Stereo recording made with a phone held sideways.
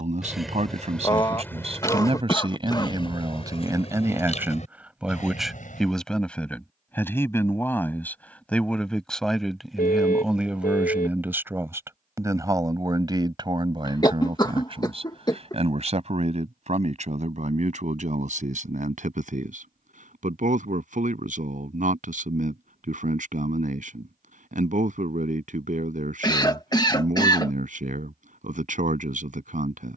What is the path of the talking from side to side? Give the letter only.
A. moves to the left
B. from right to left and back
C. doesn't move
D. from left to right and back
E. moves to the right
B.